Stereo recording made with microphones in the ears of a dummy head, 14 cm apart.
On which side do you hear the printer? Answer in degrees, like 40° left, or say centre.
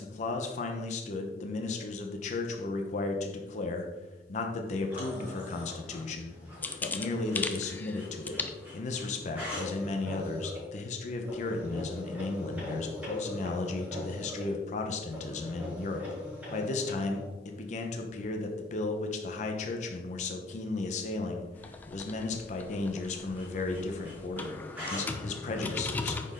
10° right.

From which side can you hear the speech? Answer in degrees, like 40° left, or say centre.
50° left.